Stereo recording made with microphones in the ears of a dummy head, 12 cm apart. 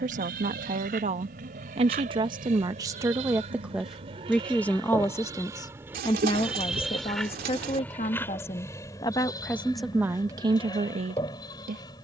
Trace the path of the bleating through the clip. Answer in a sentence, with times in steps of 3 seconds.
In this clip you hear the bleating on the right from 0 s, in the centre from 6 s and on the left from 9 s.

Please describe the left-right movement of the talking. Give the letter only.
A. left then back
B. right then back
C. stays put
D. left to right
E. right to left
A.